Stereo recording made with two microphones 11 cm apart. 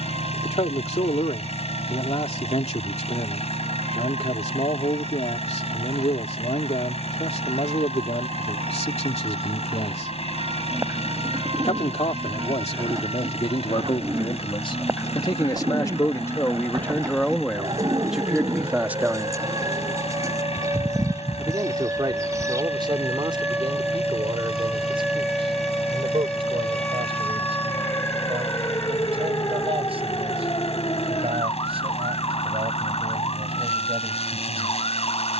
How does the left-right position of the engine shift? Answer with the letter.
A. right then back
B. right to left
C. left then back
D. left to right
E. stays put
E.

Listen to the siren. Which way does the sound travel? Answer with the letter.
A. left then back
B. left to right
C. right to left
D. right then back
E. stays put
C.